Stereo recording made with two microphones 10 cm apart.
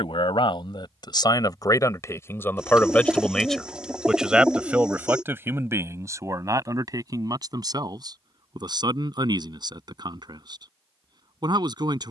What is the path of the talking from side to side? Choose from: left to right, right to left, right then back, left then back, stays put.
left to right.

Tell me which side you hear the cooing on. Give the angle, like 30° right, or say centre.
10° right.